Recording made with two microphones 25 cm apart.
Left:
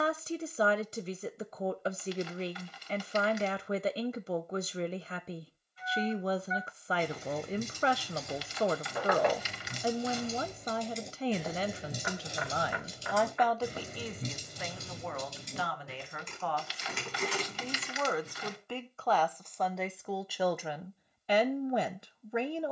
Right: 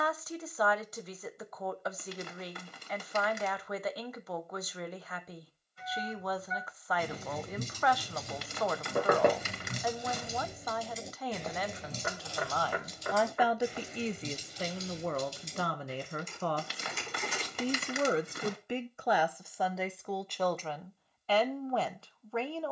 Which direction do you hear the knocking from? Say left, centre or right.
right.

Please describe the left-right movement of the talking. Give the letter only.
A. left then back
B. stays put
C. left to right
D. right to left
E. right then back
E.